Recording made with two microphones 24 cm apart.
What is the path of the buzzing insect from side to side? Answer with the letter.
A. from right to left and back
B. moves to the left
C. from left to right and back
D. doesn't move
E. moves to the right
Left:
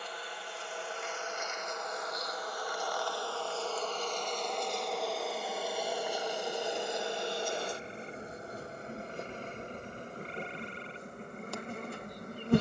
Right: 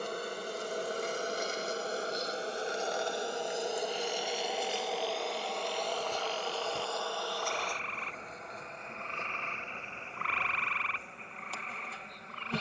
B.